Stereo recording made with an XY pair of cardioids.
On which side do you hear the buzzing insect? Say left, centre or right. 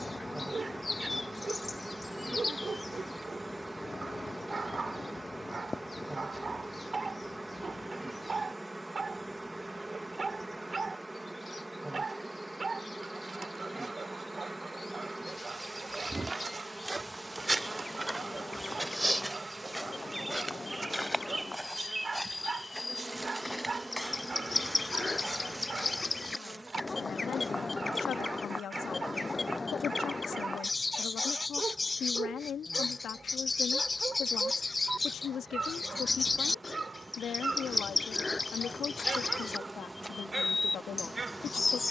centre.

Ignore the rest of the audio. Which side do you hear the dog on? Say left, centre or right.
right.